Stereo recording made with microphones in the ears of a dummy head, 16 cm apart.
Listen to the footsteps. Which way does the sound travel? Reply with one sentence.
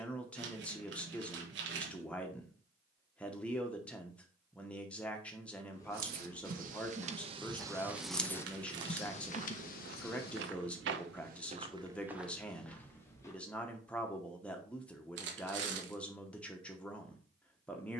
In this clip you hear the footsteps move from left to right and back again.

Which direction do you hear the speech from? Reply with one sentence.
You can hear the speech in the centre.